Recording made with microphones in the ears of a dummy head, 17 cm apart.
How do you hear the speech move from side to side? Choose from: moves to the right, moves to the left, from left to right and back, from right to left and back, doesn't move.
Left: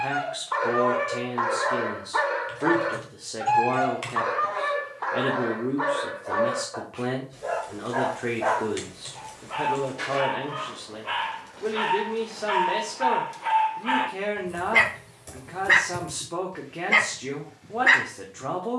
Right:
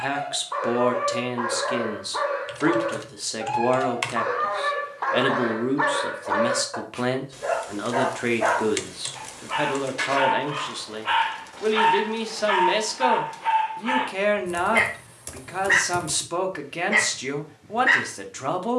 doesn't move.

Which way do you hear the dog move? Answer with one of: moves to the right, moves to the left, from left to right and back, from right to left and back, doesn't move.
from left to right and back.